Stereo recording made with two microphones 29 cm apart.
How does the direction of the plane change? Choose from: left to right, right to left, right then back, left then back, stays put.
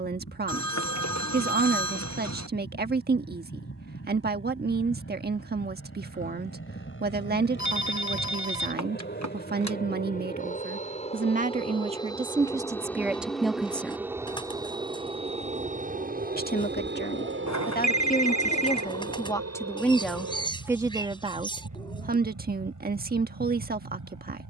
left to right.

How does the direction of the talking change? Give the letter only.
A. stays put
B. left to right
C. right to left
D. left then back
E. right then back
D.